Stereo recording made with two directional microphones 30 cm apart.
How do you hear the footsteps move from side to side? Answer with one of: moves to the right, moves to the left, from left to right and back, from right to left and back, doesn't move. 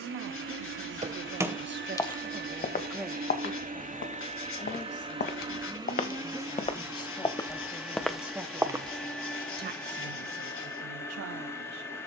from right to left and back.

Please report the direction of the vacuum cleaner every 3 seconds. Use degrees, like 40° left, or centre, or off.
40° right, 20° right, 10° right, 10° left.